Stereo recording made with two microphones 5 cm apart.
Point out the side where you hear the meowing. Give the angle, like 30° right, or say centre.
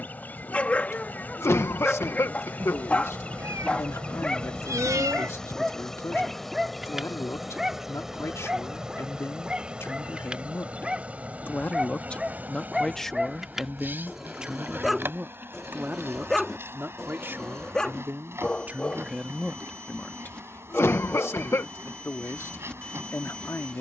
70° right.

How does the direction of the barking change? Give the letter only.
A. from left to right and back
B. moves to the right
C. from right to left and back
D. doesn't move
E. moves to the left
A.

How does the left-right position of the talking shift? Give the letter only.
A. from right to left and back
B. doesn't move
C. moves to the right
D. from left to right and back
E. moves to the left
D.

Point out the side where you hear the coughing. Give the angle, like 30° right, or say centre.
50° left.